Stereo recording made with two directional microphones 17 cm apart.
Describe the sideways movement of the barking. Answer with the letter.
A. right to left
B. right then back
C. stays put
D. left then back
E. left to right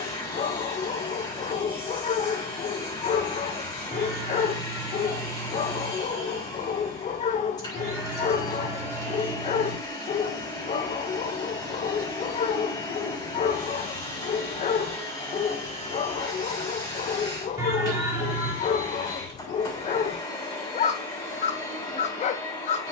C.